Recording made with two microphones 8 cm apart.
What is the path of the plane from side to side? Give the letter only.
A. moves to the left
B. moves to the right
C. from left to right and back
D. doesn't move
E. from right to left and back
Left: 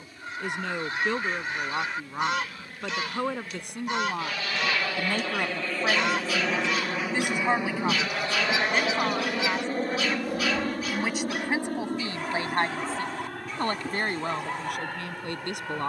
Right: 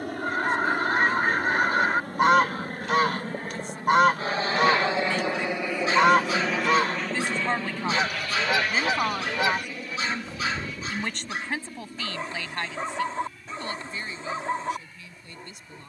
A.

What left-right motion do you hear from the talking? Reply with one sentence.
In this clip you hear the talking move from left to right and back again.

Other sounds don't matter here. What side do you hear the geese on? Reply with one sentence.
In this clip you hear the geese on the right.